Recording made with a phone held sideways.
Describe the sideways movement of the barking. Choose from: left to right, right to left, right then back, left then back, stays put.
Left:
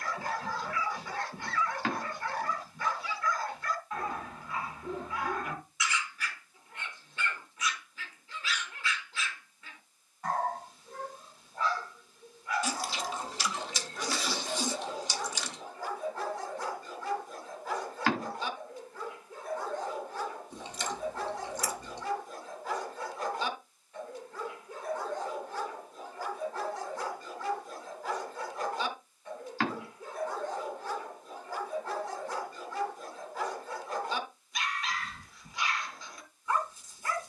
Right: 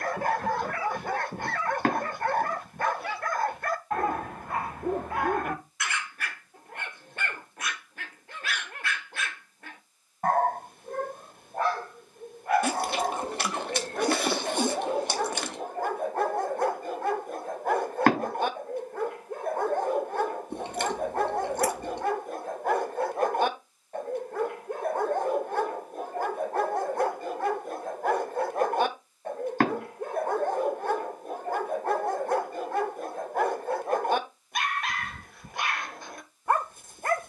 stays put.